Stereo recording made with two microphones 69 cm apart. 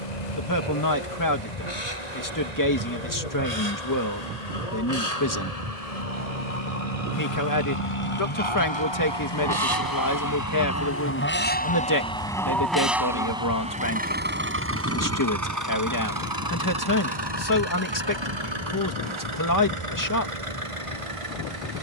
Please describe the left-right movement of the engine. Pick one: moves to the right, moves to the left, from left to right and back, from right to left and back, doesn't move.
moves to the right.